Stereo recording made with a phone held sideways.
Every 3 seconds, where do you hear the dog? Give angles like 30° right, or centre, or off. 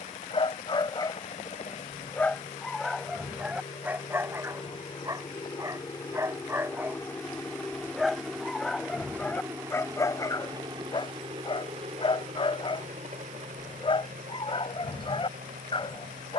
20° left, 20° right, 10° right, 30° left, 40° left, 40° left.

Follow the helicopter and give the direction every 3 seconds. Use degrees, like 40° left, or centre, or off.
50° left, 40° left, 10° left, 30° right, 50° right, 60° right.